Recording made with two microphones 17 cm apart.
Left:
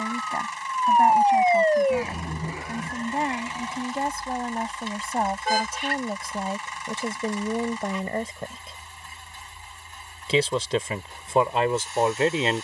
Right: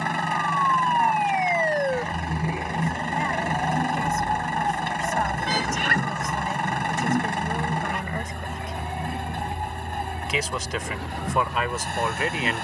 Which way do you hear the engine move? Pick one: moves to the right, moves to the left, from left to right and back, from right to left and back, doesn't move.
doesn't move.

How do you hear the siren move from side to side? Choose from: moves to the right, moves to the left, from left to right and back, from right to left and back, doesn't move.
moves to the right.